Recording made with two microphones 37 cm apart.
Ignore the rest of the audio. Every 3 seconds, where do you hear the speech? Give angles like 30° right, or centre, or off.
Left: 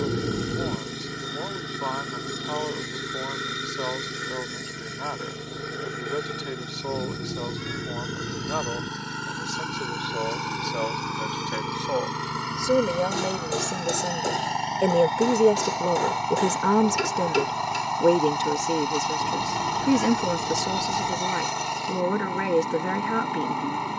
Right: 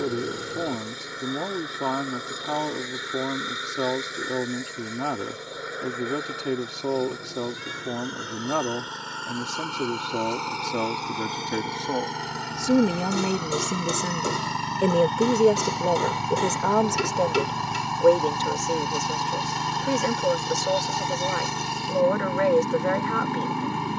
70° right, 70° right, 70° right, 60° right, 30° right, 20° left, 40° left, 40° left.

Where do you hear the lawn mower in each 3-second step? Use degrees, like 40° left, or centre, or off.
40° left, 40° left, 40° left, 30° left, centre, 30° right, 30° right, 30° right.